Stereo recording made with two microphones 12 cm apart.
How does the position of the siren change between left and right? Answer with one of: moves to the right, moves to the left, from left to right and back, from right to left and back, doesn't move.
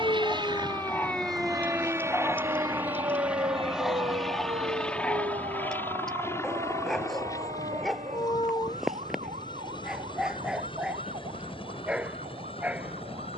moves to the right.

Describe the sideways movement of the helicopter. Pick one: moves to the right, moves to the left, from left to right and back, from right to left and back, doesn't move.
moves to the left.